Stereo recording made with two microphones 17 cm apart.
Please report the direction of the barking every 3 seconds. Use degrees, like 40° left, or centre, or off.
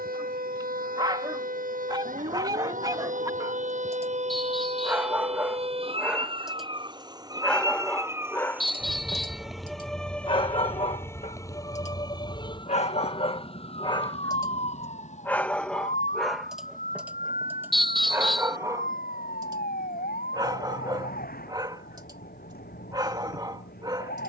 20° right, 10° right, 10° left, 30° left, 30° left, centre, 20° right, 20° right.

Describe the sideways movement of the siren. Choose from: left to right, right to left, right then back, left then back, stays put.
right to left.